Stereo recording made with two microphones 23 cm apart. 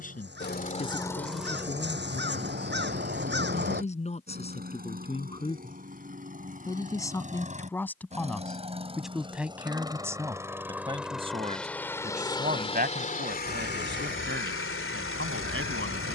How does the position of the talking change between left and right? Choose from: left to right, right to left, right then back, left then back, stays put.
left to right.